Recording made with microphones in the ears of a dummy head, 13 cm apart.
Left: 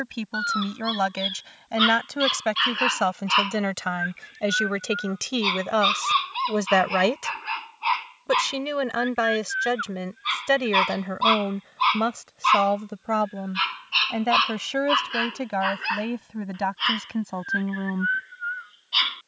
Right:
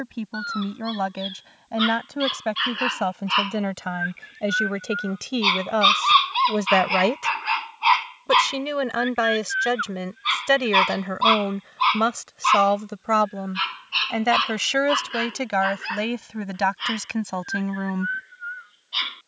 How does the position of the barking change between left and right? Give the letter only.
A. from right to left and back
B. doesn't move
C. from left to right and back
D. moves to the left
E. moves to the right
C.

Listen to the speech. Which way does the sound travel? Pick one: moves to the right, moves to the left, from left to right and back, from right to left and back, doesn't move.
moves to the right.